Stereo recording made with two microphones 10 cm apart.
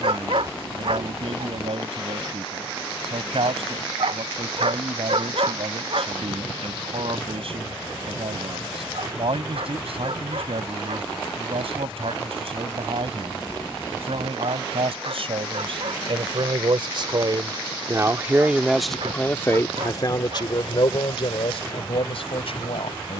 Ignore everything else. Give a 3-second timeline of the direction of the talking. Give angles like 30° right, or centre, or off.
70° right, 70° right, 70° right, 70° right, 70° right, 60° right, 20° left, 70° left.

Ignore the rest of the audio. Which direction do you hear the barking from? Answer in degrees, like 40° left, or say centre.
70° right.